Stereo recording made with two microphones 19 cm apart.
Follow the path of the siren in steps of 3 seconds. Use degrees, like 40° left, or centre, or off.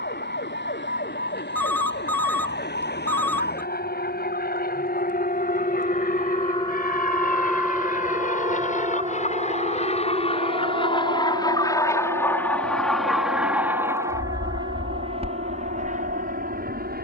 70° left, 50° left, centre, 50° right, 60° right, 70° right.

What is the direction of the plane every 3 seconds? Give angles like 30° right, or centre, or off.
60° left, 60° left, 50° left, 30° left, 10° right, 40° right.